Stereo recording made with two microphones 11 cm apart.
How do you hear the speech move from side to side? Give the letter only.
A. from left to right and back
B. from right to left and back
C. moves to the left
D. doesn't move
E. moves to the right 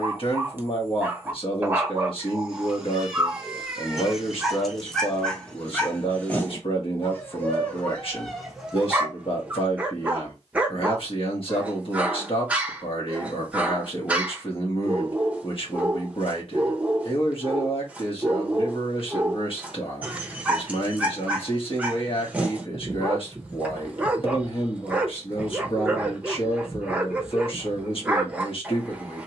D.